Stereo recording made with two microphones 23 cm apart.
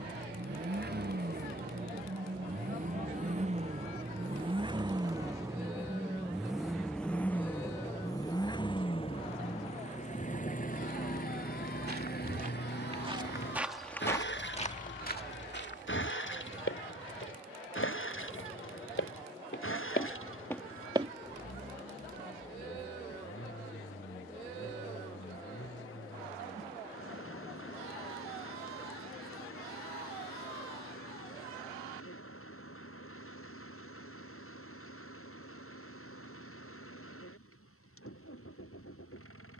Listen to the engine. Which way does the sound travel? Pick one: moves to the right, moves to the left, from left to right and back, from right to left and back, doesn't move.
moves to the left.